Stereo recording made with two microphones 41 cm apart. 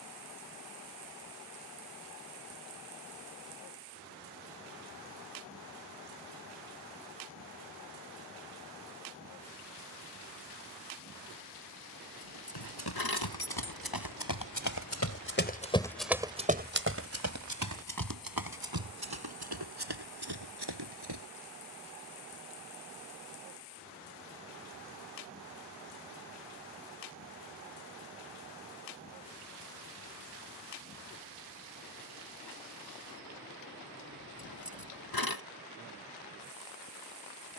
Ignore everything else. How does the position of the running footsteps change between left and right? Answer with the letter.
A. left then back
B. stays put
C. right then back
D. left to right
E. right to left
D.